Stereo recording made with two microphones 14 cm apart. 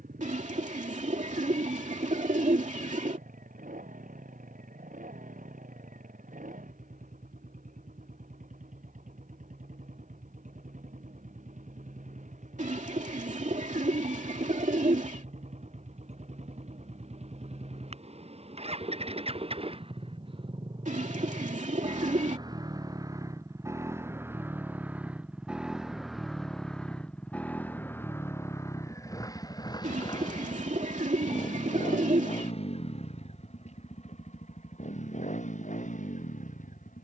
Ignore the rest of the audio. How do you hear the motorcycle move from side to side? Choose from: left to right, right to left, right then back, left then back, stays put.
right to left.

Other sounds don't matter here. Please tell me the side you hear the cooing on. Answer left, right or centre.
right.